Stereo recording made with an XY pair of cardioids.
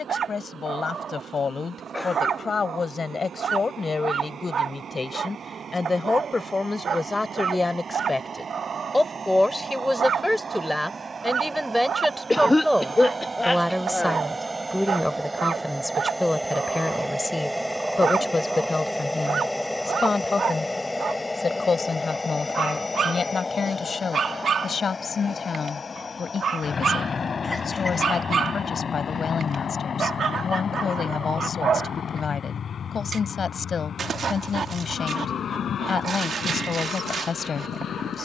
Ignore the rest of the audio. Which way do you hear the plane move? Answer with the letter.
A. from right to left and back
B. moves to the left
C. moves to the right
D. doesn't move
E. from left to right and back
B.